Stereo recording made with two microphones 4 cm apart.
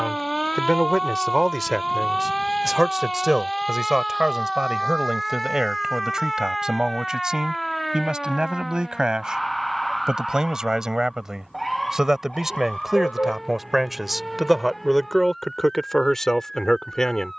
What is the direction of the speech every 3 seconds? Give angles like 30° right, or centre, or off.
centre, 10° right, 20° right, 20° right, 10° right, 10° left.